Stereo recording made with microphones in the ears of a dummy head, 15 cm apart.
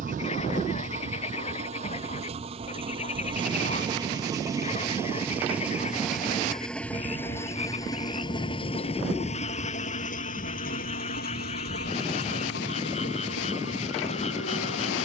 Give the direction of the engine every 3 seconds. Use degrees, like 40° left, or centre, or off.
40° right, 20° right, 20° left, 50° left, 70° left.